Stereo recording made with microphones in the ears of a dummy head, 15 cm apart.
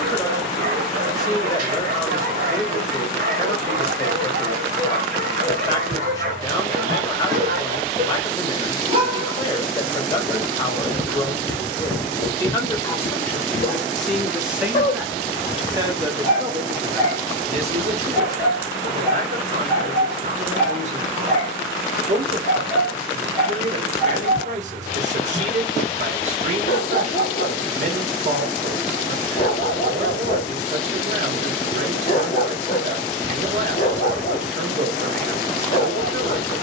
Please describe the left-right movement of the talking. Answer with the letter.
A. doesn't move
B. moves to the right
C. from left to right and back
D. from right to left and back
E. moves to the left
B.